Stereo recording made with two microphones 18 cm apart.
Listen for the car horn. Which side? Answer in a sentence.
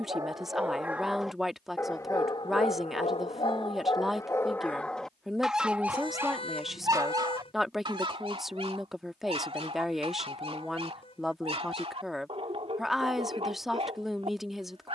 In this clip you hear the car horn on the left.